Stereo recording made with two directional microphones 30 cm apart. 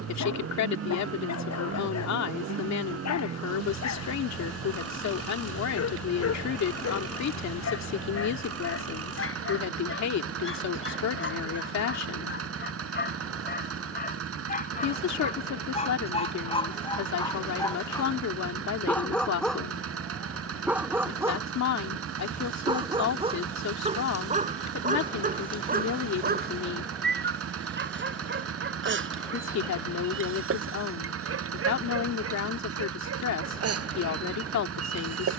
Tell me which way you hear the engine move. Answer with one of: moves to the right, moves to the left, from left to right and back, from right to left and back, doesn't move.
doesn't move.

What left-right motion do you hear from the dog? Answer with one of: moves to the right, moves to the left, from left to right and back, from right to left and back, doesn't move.
moves to the right.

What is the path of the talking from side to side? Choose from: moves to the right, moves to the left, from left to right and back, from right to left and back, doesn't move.
doesn't move.